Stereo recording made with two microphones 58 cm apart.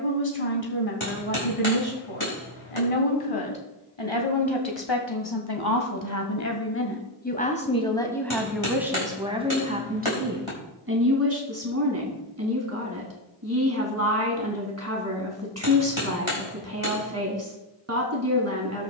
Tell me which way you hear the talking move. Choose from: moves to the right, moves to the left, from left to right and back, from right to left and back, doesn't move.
moves to the right.